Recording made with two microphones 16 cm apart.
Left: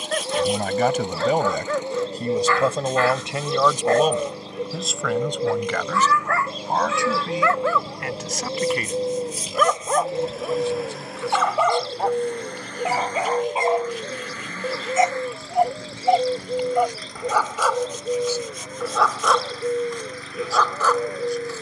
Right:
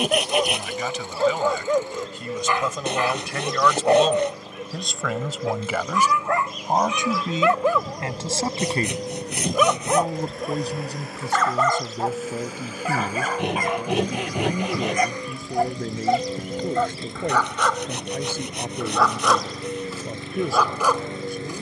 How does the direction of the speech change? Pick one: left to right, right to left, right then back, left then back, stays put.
left to right.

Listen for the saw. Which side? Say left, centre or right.
right.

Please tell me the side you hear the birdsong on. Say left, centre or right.
left.